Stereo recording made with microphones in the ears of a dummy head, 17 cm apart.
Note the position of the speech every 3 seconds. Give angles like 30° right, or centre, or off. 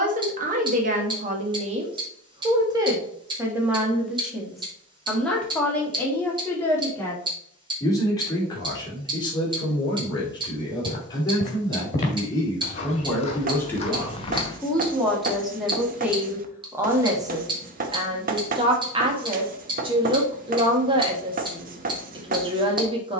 30° right, centre, 20° left, 20° left, 10° left, 10° right, 20° right, 20° right.